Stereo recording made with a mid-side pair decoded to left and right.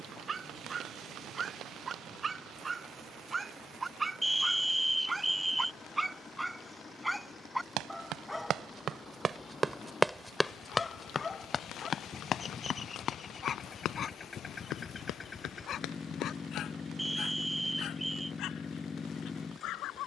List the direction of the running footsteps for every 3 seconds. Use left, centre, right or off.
off, off, right, centre, left, left, off.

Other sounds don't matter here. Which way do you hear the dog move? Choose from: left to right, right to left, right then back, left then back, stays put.
right to left.